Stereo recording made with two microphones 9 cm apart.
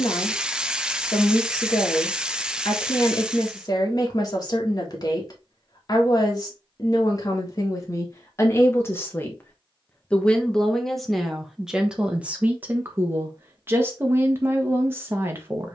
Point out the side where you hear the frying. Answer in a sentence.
You can hear the frying in the centre.